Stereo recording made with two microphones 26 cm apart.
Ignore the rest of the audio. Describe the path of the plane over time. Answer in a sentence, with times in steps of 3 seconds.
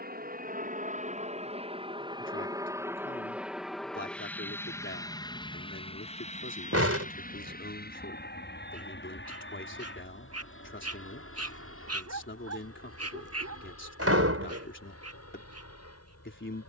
In this clip you hear the plane on the right from 0 s, in the centre from 3 s and on the left from 6 s.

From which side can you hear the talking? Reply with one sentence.
In this clip you hear the talking on the left.